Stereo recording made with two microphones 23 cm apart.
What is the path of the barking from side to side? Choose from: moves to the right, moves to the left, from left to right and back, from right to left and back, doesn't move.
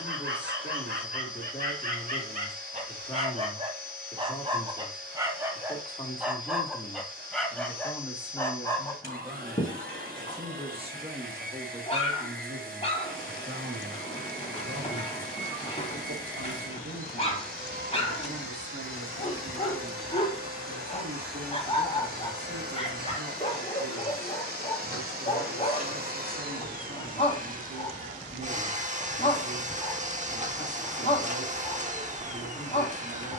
moves to the left.